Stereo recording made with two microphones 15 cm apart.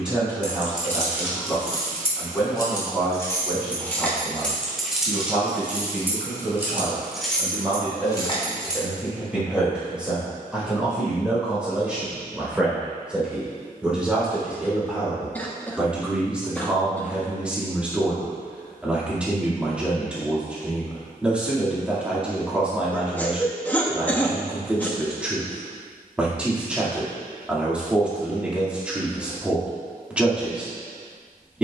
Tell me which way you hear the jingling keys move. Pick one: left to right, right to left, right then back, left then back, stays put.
right then back.